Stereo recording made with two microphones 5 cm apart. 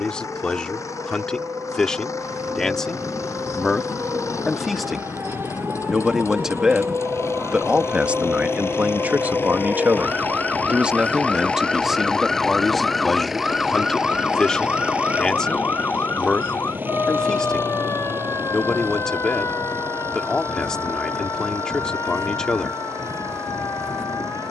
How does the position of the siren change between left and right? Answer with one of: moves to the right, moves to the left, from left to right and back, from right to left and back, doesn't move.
moves to the left.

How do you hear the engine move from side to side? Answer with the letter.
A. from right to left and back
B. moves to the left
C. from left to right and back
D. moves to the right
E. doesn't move
D.